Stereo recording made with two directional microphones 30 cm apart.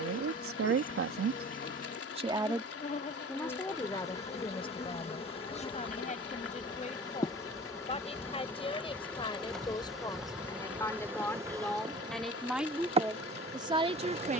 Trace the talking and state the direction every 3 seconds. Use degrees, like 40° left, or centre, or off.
40° right, 20° left, 20° left, 10° left, 10° right.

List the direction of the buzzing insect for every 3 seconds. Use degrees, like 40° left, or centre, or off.
30° left, 20° left, 10° left, centre, 20° right.